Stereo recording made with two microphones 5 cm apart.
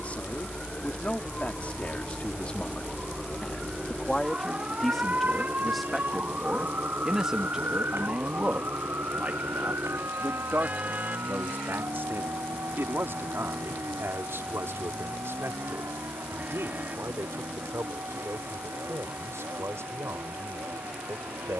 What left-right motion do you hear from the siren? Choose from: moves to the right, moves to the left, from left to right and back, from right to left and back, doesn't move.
moves to the right.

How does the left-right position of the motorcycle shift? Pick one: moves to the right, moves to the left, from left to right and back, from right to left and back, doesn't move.
moves to the right.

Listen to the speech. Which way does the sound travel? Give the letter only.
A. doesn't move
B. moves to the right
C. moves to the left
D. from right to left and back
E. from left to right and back
B.